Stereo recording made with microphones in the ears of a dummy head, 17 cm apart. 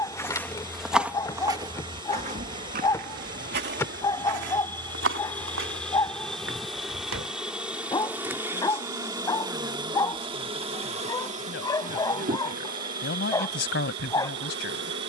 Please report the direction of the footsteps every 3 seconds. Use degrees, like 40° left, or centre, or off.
20° right, 70° right, 80° right, off, off.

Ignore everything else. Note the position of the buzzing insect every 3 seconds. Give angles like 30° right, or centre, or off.
20° left, 10° left, 10° right, 30° right, 50° right.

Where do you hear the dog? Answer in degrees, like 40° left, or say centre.
20° left.